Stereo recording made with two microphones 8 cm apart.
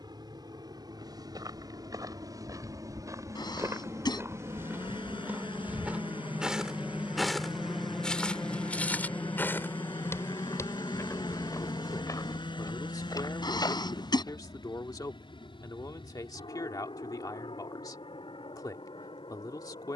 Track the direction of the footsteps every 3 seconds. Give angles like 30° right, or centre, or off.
50° right, 30° right, 10° left, 30° left, 50° left, off, off.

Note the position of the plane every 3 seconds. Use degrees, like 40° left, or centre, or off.
60° right, 40° right, 10° right, 30° left, 60° left, 70° left, 70° left.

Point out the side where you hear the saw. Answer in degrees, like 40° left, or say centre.
80° left.